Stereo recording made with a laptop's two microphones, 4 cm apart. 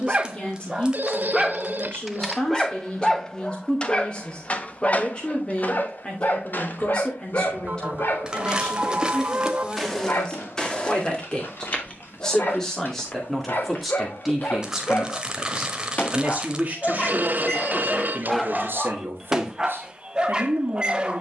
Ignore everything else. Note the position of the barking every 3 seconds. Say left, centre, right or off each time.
centre, left, left, left, left, left, centre.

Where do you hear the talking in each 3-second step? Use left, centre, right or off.
left, left, left, left, centre, right, right.